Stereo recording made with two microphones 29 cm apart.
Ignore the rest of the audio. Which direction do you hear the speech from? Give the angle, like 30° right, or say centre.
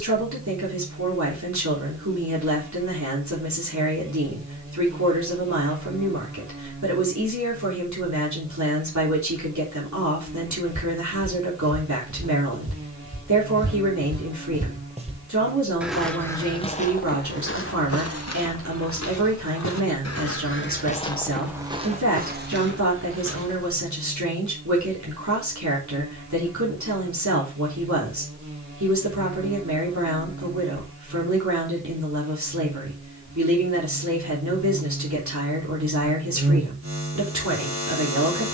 70° right.